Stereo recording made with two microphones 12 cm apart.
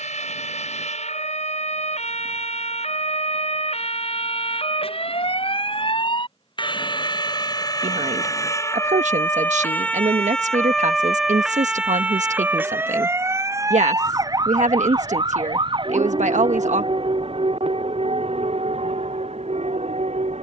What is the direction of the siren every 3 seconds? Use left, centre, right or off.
left, left, left, centre, right, right, right.